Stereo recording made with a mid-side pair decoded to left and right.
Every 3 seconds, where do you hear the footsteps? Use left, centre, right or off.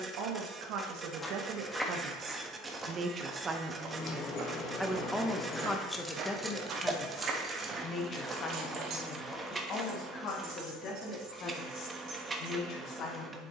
centre, right, right, centre, off.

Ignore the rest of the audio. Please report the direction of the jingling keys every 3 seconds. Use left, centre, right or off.
off, left, right, right, right.